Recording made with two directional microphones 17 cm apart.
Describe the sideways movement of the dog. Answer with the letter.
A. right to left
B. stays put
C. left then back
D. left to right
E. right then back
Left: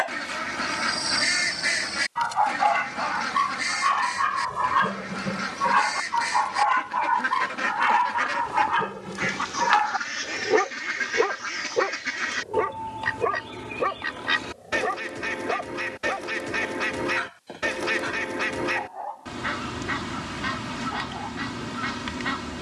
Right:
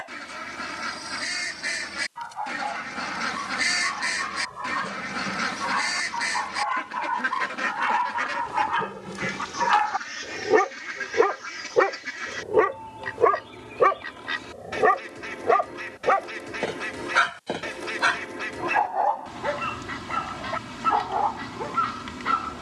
D.